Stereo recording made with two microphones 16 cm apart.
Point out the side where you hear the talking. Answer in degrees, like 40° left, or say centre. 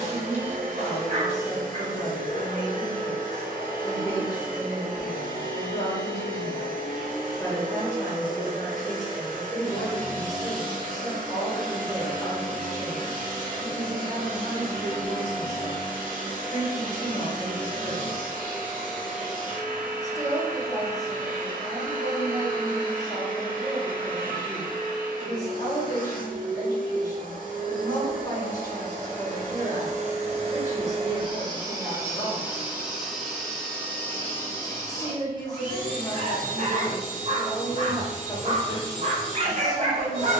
20° left.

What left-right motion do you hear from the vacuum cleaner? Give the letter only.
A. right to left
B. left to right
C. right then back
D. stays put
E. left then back
A.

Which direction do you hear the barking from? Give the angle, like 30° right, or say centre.
40° right.